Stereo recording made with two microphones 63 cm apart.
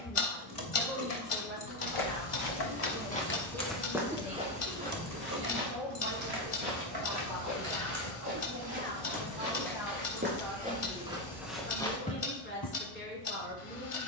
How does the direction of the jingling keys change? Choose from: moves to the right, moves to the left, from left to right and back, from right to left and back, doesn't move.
moves to the right.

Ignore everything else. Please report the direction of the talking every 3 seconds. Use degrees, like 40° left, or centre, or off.
10° right, 60° right, 30° right, centre, 20° left.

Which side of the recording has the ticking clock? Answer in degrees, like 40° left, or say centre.
50° left.